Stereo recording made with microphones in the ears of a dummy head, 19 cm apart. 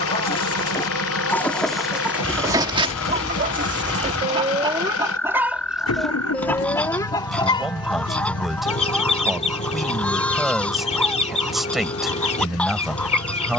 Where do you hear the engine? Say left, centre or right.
left.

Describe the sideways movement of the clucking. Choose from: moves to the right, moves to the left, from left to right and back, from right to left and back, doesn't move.
from left to right and back.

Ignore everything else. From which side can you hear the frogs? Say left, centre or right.
centre.